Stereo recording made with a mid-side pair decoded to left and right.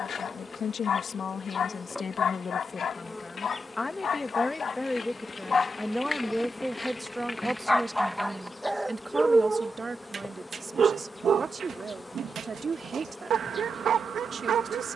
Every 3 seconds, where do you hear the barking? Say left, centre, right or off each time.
left, left, centre, right, right.